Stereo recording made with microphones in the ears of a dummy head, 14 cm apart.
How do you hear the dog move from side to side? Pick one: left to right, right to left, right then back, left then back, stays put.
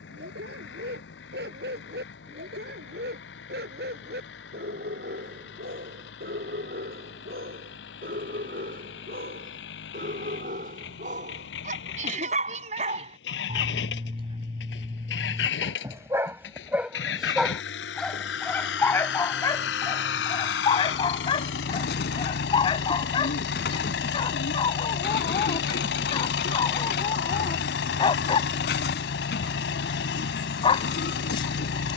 right to left.